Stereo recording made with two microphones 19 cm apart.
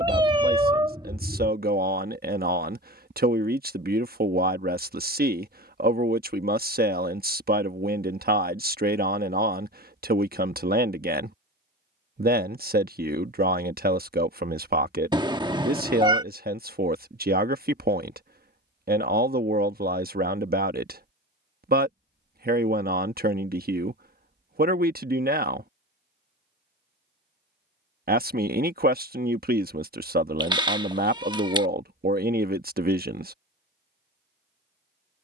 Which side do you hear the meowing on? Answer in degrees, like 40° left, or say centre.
20° right.